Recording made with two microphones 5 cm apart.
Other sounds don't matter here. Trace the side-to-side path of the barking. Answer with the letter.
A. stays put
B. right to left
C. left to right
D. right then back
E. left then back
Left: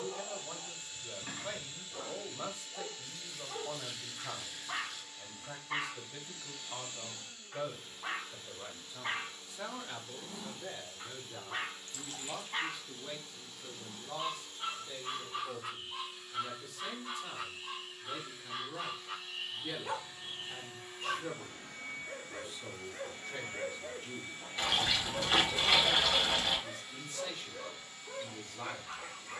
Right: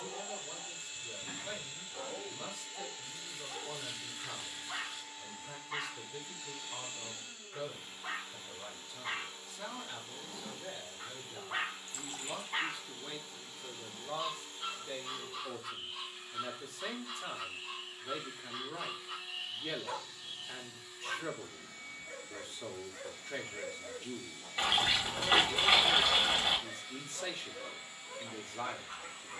D.